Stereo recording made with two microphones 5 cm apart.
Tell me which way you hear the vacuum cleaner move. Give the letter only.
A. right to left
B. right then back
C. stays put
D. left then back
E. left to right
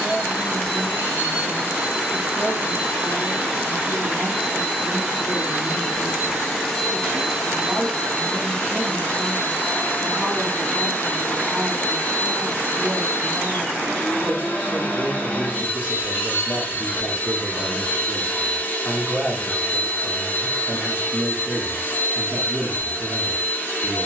A.